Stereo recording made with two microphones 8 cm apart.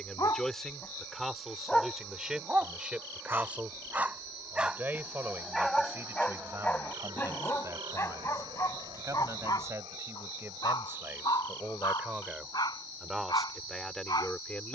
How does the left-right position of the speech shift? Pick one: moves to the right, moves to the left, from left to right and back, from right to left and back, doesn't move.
from left to right and back.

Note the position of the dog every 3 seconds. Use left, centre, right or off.
centre, centre, left, left, left.